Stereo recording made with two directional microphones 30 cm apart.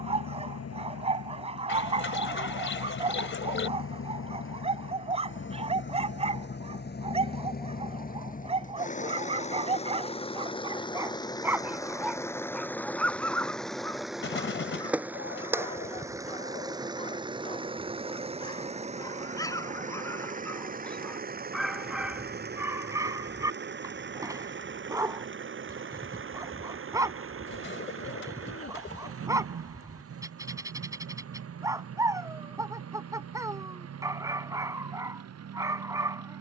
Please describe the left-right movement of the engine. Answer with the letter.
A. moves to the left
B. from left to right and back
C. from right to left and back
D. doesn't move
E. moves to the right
E.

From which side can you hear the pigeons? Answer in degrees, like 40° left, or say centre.
40° left.